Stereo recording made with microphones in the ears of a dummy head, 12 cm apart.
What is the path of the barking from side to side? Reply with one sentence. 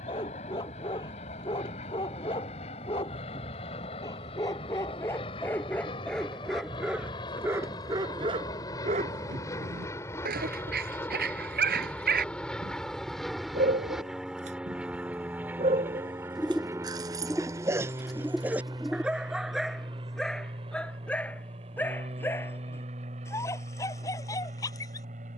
In this clip you hear the barking go right and come back.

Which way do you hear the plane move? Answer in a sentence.
You can hear the plane go from the left side to the right.